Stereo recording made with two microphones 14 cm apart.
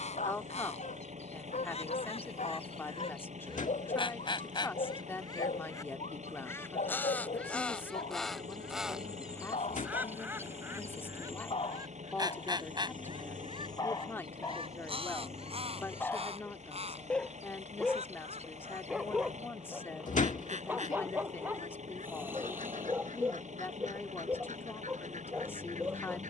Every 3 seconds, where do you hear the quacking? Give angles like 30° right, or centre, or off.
50° left, 30° left, 10° left, 20° right, 40° right, 50° right, 60° right, 60° right, 70° right.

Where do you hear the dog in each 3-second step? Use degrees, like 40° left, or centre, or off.
60° left, 60° left, 60° left, 50° left, 30° left, 10° left, 10° right, 20° right, 20° right.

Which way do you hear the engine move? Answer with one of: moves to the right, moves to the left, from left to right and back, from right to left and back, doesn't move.
doesn't move.